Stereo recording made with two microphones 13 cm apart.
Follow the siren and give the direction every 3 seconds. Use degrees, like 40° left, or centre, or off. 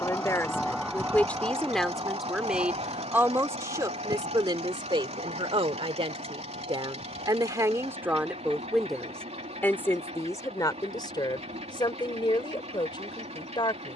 20° right, 60° right, 70° right, 70° right, 70° right.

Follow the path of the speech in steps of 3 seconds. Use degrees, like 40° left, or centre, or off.
10° left, 30° right, 20° right, 20° left, 30° left.